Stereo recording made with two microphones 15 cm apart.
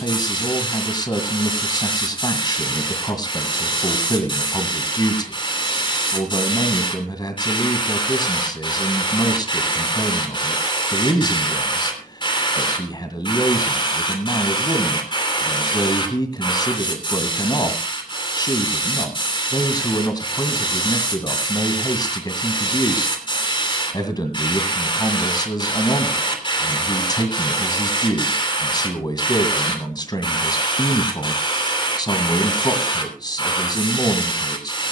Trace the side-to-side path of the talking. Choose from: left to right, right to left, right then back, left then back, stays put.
stays put.